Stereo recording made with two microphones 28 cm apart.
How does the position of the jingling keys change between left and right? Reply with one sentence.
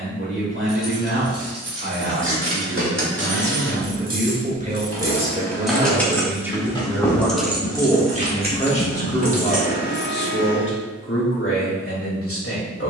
In this clip you hear the jingling keys move from right to left and back again.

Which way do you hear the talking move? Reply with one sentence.
In this clip you hear the talking move from right to left.